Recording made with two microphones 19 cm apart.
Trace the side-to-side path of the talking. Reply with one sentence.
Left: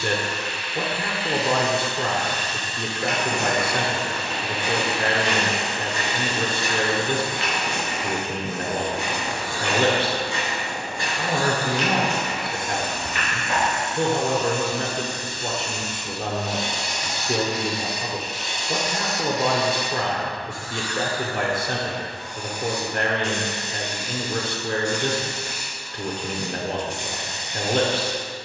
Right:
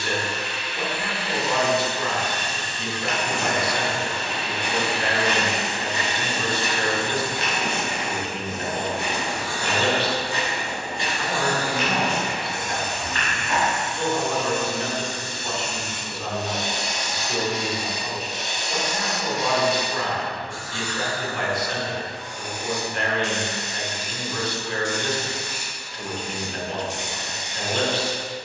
You can hear the talking stay put.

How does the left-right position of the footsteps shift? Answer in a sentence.
In this clip you hear the footsteps go right and come back.